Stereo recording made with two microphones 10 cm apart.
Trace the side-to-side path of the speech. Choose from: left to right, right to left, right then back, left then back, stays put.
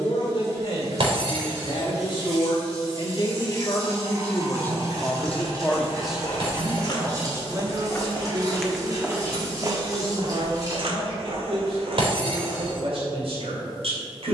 left to right.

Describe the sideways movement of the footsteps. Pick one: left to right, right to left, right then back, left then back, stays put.
left to right.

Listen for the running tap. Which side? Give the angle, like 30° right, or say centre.
30° right.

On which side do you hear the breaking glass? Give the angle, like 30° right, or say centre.
60° right.